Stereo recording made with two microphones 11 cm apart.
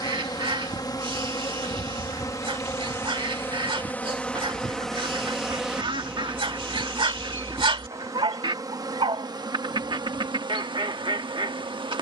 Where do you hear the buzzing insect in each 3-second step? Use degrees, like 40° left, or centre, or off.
30° left, 10° left, 20° right, 40° right.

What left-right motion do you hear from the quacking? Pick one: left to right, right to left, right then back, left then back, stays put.
stays put.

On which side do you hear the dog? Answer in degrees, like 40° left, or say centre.
50° right.